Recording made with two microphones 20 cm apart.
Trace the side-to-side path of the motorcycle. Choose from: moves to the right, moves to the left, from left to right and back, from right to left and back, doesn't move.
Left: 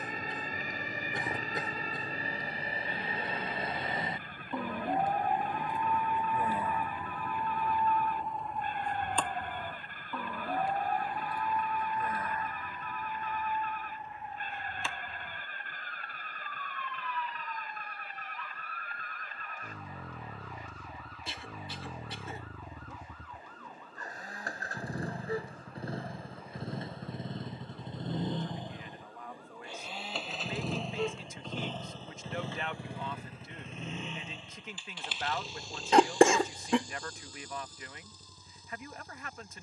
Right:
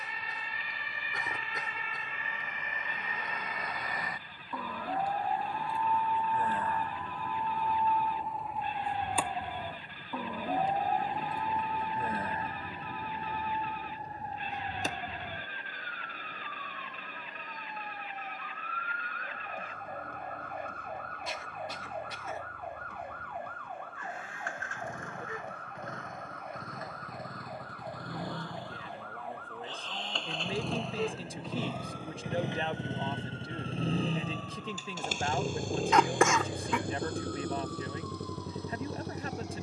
moves to the right.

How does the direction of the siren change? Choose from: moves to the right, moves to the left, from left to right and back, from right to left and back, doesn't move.
moves to the right.